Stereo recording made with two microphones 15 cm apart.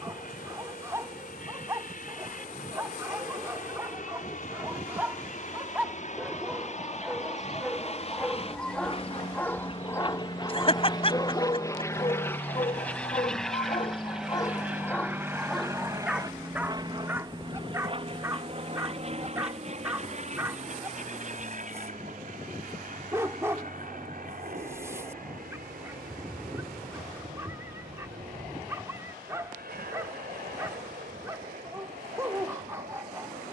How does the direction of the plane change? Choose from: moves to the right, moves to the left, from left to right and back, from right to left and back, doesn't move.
moves to the right.